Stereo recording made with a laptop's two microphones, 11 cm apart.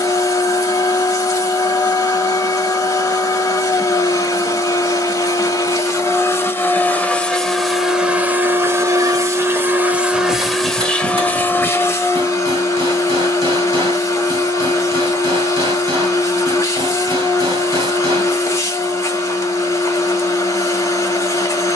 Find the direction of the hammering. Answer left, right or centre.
right.